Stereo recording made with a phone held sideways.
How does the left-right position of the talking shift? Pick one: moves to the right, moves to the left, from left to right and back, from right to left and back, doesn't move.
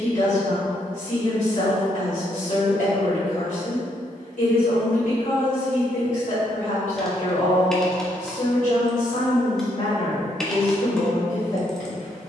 doesn't move.